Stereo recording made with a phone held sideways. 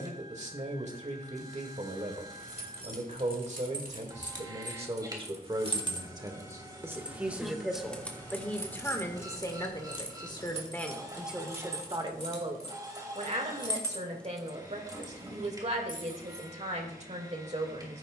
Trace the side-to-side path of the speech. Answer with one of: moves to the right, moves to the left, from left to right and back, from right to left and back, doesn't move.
from right to left and back.